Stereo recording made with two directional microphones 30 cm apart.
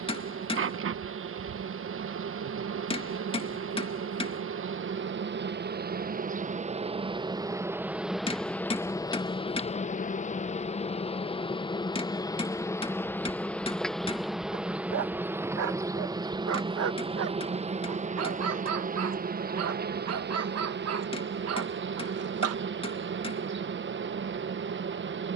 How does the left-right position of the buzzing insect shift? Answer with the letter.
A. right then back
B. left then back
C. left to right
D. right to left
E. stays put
B.